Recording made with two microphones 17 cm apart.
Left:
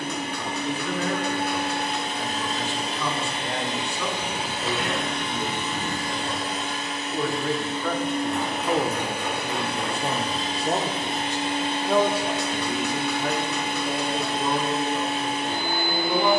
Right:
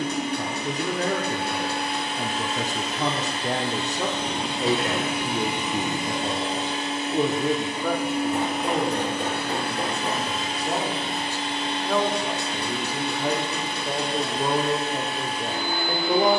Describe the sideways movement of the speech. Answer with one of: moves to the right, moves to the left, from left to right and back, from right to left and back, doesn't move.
from right to left and back.